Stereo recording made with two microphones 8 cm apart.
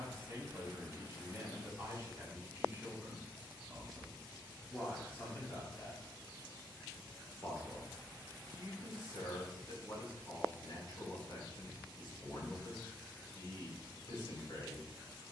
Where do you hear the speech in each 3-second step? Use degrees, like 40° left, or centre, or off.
30° right, 10° left, 50° left, 50° left, 50° left.